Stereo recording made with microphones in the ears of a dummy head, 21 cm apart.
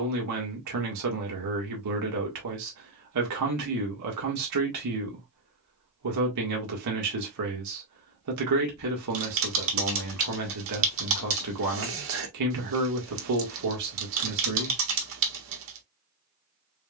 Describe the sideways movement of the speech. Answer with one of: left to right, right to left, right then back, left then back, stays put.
stays put.